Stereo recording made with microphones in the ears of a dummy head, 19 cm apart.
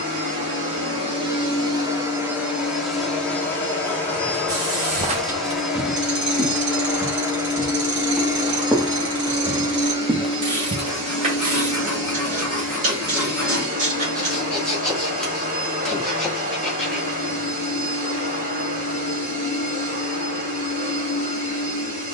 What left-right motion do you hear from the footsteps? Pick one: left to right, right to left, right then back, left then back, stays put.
left then back.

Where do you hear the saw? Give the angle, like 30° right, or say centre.
centre.